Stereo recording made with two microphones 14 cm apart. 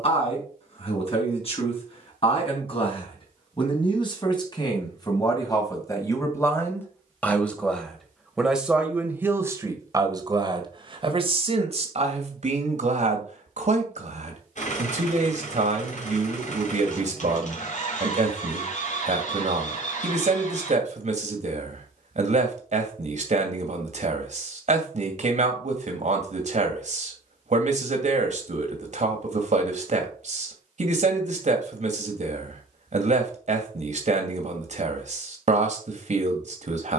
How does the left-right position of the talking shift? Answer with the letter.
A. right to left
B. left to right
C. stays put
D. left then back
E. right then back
B.